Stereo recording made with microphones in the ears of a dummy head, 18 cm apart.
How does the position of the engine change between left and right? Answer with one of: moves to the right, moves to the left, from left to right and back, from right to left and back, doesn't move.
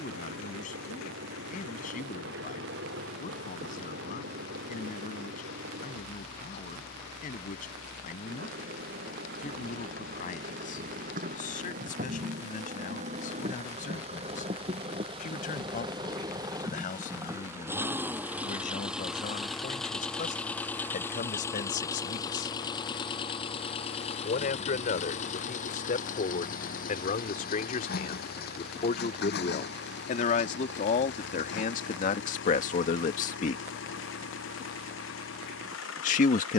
moves to the left.